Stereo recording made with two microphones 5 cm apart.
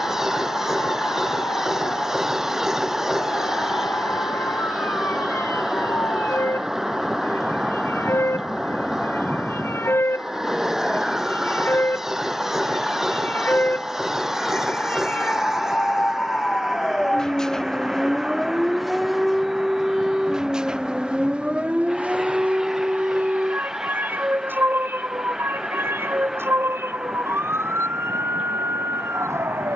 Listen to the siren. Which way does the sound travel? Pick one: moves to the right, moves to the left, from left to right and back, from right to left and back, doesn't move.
moves to the right.